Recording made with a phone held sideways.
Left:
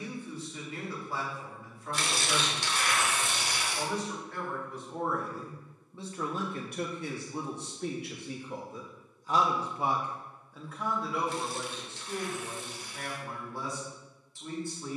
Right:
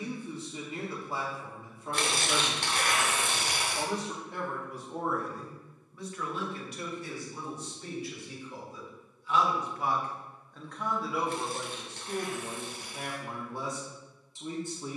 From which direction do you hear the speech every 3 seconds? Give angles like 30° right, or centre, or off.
20° right, 10° right, 60° left, 10° left, 20° right.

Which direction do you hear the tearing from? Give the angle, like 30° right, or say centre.
60° right.